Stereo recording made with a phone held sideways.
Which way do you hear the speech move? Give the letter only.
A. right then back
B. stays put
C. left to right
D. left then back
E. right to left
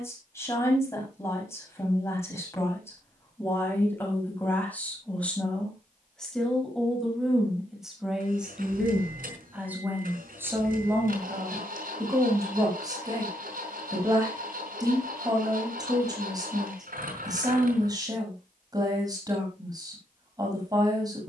C.